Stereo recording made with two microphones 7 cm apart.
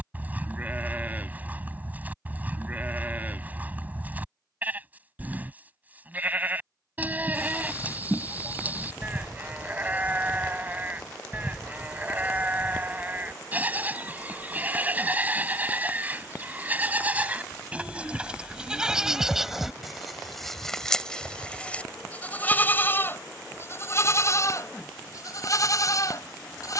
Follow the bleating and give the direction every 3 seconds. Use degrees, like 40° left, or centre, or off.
20° right, 20° right, 20° right, 20° right, 20° right, 20° right, 10° right, 20° left, 50° left.